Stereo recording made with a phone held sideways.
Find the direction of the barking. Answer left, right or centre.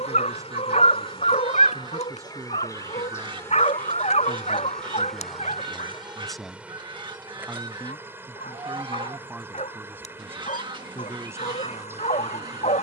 left.